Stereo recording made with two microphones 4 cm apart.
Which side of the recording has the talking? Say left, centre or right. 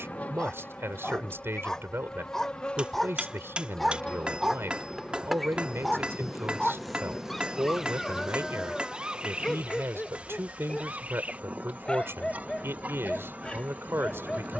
right.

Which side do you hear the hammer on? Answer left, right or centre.
right.